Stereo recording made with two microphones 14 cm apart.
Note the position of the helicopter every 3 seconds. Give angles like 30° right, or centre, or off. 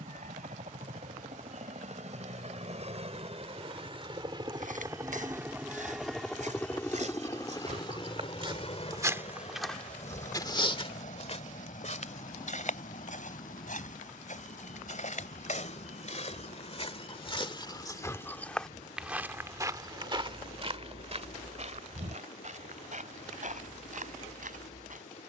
60° right, 30° right, 20° left, 60° left, 70° left, 70° left, 80° left, 80° left, 80° left.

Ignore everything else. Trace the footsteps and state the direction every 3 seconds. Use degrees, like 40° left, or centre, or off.
off, 70° right, 50° right, 30° left, 70° left, 50° left, 20° right, 60° right, 70° right.